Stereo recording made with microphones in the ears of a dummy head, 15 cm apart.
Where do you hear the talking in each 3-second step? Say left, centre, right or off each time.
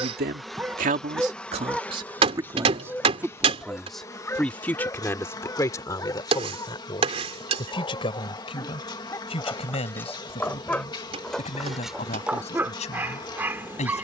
right, centre, left, left, left.